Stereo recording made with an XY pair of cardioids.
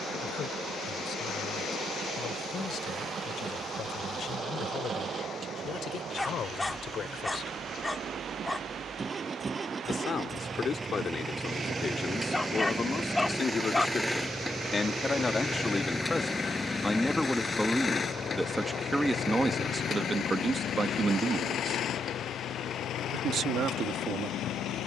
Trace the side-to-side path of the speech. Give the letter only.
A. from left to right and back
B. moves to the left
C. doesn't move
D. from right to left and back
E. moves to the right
E.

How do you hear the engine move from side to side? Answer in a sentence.
You can hear the engine move to the left.